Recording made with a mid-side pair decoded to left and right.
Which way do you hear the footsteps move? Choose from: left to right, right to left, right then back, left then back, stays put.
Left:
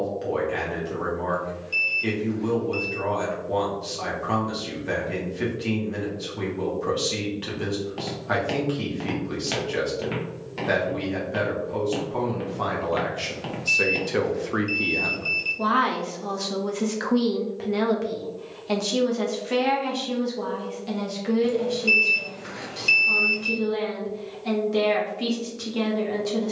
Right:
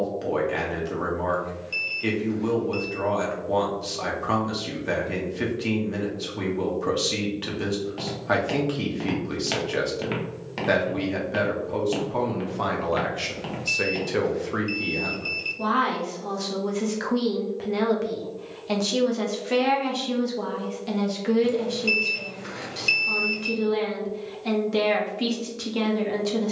right then back.